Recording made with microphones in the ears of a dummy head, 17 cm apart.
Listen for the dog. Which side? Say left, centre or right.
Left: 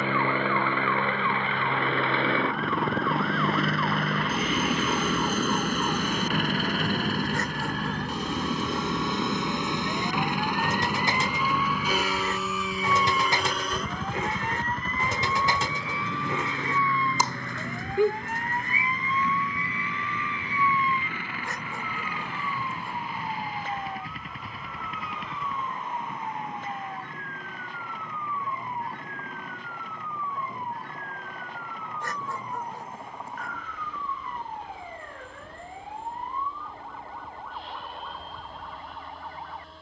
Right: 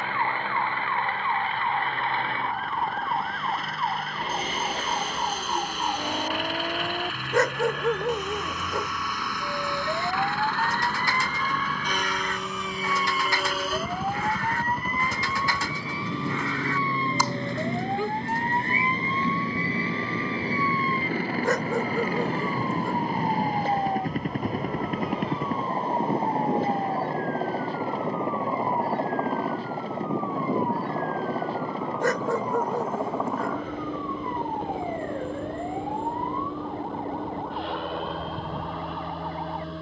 right.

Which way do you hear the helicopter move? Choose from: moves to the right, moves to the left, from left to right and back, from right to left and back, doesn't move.
moves to the right.